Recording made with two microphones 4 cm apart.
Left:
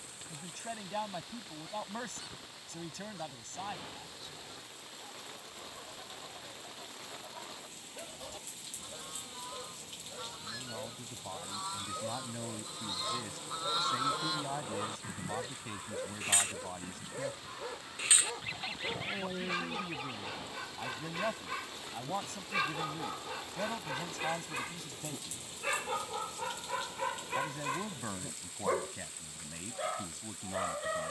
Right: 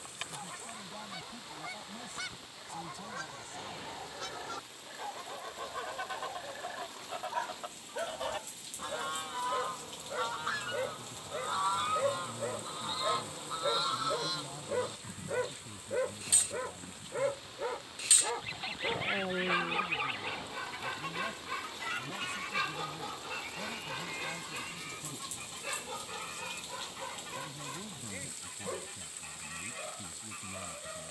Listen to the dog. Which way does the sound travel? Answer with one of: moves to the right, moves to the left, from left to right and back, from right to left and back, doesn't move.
moves to the left.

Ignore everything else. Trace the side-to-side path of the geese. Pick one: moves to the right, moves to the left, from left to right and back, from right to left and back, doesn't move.
from right to left and back.